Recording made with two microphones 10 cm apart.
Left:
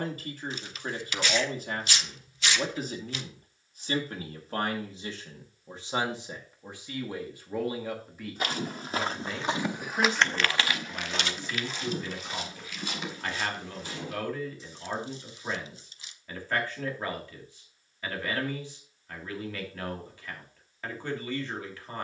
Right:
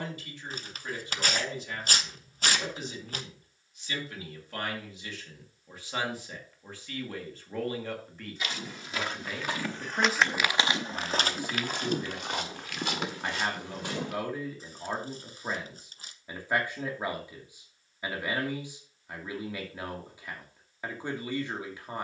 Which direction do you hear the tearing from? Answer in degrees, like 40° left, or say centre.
50° right.